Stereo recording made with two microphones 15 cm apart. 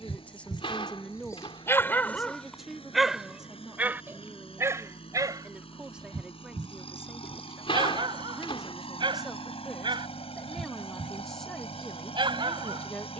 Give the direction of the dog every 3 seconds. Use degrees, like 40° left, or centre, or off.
20° left, 20° right, 30° right, 30° right, 30° right.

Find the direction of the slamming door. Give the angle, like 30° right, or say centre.
40° left.